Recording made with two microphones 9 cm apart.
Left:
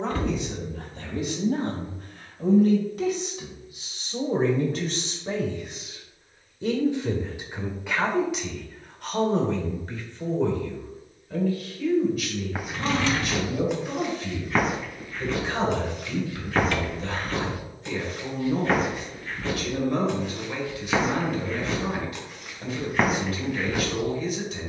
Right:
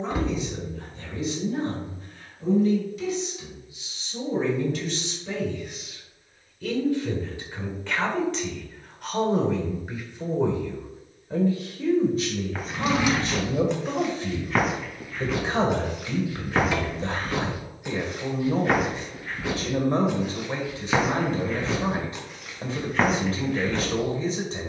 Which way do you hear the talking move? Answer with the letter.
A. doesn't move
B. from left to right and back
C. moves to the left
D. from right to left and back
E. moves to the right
E.